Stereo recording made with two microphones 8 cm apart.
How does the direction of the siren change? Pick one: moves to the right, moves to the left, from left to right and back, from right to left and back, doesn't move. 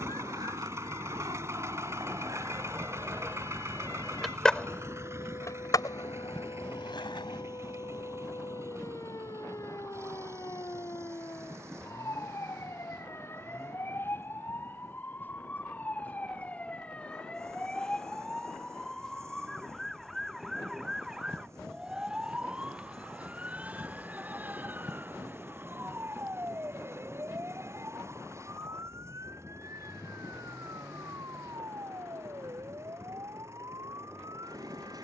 moves to the right.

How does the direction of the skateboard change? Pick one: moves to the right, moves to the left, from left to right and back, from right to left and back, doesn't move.
moves to the left.